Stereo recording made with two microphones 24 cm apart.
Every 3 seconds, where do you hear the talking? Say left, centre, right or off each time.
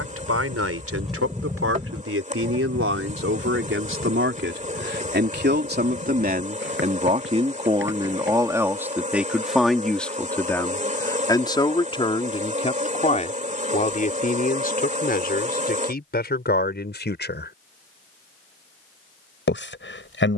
right, right, right, centre, left, left, left.